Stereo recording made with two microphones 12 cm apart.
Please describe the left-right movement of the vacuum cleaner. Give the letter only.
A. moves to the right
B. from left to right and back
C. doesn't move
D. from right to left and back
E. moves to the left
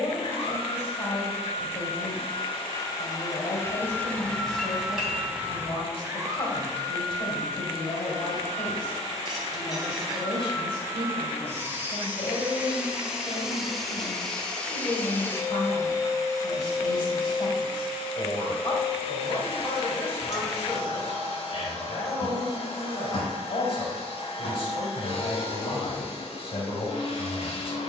B.